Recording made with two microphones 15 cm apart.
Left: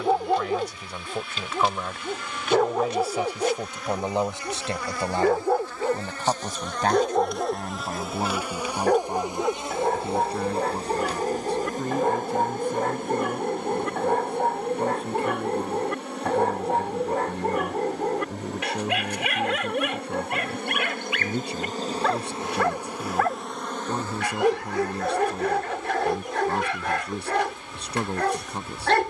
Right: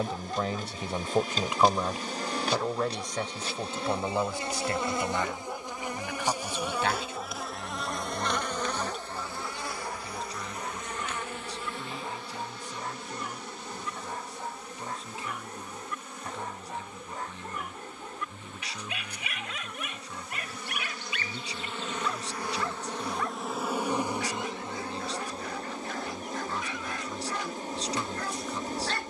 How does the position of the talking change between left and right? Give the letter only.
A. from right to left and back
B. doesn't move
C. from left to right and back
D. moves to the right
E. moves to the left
E.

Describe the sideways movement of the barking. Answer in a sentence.
In this clip you hear the barking stay in one place.